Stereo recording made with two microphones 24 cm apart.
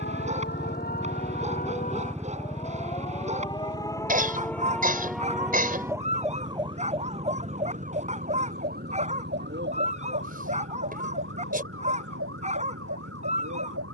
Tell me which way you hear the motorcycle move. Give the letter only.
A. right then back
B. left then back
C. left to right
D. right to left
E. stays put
C.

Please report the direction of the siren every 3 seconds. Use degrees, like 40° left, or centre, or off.
30° left, 10° left, 30° right, 50° right, 60° right.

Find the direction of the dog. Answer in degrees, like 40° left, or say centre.
30° right.